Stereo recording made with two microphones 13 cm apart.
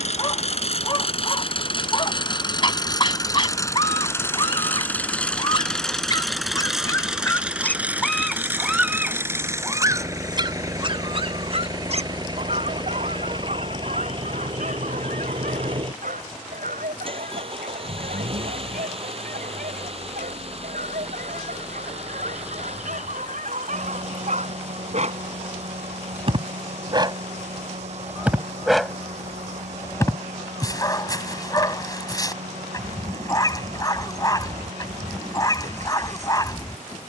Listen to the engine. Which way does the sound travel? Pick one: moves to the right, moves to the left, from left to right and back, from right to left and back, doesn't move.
moves to the right.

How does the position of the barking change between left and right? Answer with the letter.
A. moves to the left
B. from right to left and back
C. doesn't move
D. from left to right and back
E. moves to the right
D.